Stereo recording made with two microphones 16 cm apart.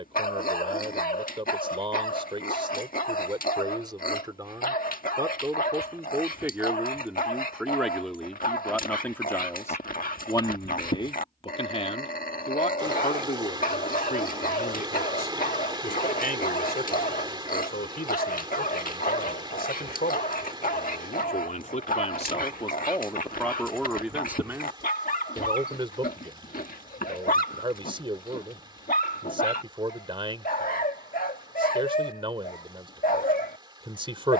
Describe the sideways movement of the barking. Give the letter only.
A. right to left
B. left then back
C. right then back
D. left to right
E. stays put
E.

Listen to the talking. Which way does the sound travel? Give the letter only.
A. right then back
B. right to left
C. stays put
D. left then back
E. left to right
D.